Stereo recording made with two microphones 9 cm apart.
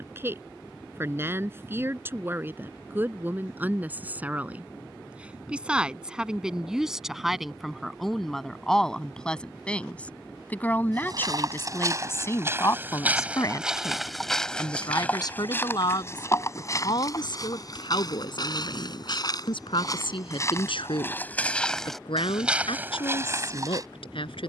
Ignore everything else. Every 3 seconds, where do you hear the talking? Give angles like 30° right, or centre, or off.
30° right, 20° right, centre, 20° left, 40° left, 60° left, 70° left, 80° left.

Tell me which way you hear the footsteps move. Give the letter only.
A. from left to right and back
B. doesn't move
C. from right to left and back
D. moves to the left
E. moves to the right
C.